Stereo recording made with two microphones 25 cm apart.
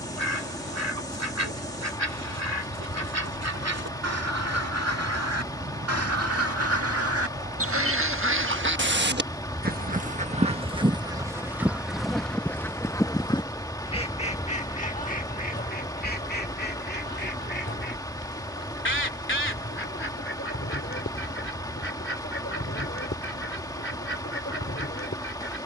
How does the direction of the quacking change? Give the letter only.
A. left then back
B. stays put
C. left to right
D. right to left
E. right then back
D.